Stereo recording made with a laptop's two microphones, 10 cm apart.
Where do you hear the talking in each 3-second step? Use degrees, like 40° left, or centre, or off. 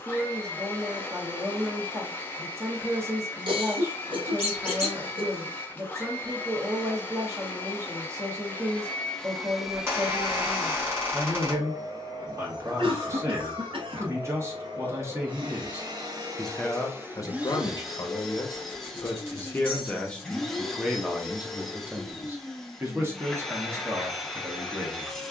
30° right, 30° right, 30° right, 30° right, 30° right, 10° left, 20° left, 20° right, 30° right.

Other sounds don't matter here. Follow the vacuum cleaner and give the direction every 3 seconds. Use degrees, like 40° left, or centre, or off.
20° left, 20° left, 20° left, 20° right, 50° right, 30° right, centre, centre, centre.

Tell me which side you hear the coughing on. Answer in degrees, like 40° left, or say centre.
60° right.